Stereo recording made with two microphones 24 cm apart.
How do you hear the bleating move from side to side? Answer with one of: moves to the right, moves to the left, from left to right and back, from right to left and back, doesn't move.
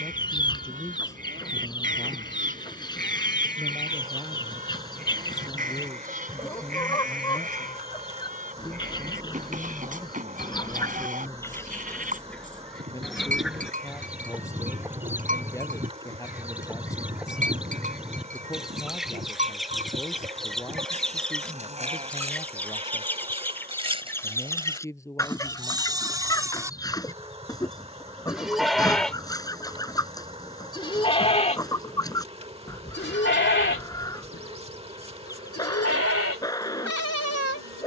moves to the left.